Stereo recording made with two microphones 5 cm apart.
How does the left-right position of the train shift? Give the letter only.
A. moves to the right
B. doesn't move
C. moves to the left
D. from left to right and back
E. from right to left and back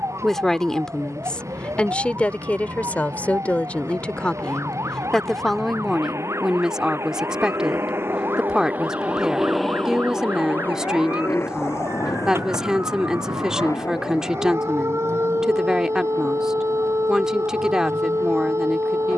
C.